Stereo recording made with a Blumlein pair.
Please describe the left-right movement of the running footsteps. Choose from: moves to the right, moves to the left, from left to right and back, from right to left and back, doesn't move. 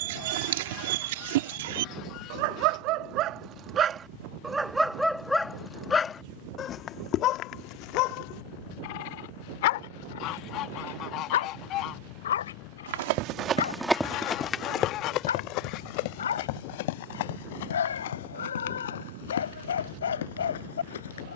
moves to the left.